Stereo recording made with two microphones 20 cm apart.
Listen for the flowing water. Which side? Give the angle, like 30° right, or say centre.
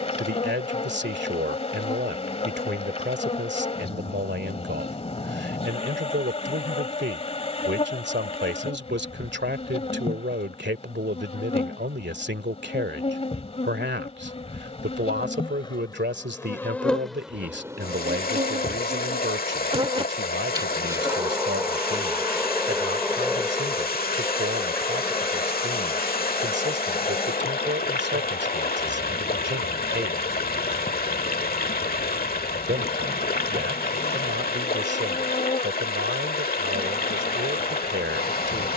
50° left.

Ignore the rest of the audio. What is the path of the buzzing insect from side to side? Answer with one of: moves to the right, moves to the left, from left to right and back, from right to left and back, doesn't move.
from left to right and back.